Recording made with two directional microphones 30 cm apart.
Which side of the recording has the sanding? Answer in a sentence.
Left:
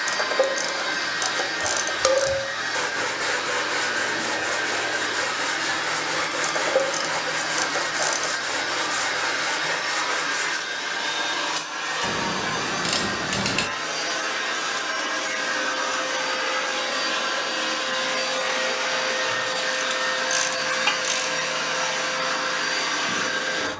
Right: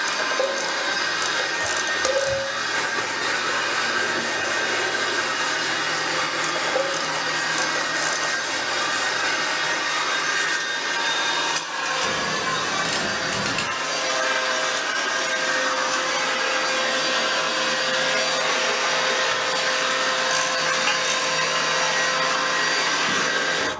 In this clip you hear the sanding on the left.